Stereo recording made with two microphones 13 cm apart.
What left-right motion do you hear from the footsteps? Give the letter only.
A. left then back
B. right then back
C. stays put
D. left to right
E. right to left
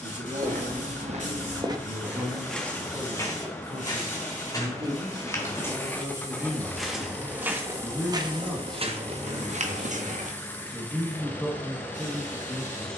A.